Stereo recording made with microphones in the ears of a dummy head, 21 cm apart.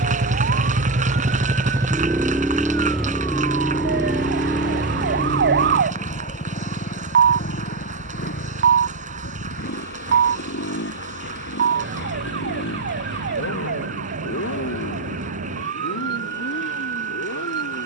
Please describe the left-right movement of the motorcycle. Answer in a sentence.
You can hear the motorcycle move from right to left.